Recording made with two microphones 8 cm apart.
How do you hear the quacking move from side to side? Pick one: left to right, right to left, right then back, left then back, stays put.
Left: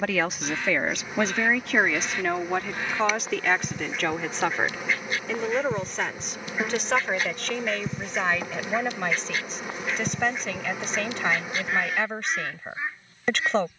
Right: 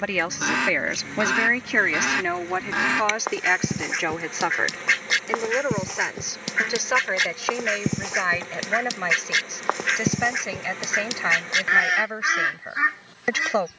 stays put.